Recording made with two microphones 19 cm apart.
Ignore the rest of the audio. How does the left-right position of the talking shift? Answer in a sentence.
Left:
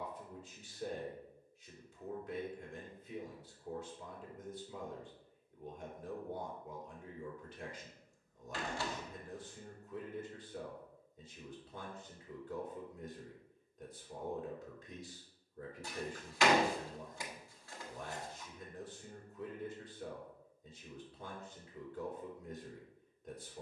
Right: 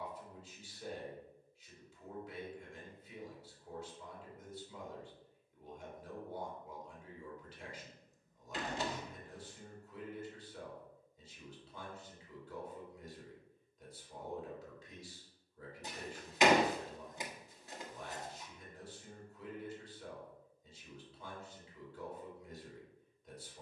You can hear the talking stay in one place.